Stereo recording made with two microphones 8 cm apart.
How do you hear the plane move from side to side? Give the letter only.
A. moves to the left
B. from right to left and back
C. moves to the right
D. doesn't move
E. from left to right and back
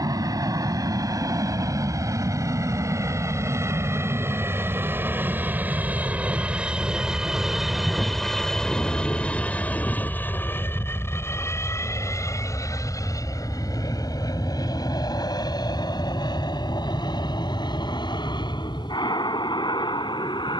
A.